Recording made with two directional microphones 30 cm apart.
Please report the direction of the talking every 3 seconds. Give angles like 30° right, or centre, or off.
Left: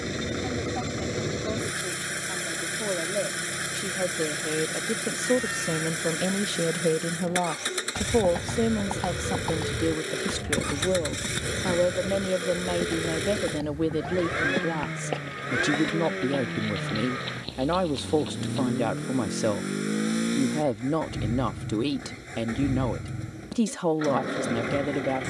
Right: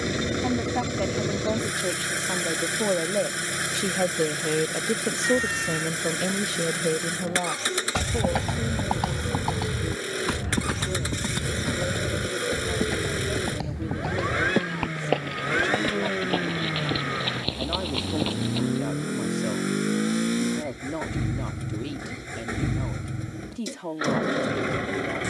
60° right, 30° right, 10° left, 50° left, 50° left, 50° left, 50° left, 50° left, 50° left.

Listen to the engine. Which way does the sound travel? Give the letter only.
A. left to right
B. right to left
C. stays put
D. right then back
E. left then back
C.